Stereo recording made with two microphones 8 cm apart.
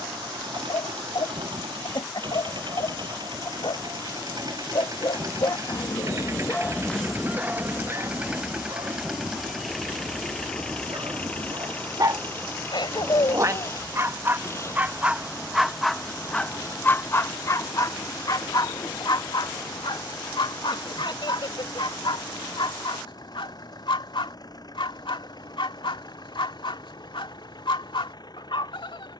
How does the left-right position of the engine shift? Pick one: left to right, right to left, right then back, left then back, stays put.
right to left.